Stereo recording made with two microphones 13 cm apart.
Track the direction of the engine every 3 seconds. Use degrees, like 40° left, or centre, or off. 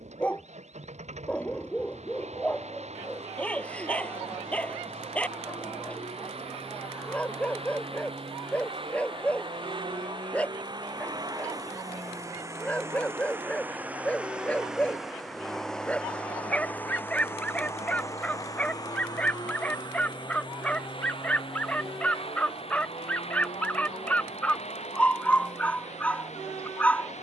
60° right, 60° right, 50° right, 40° right, 20° right, 10° left, 30° left, 50° left, 60° left.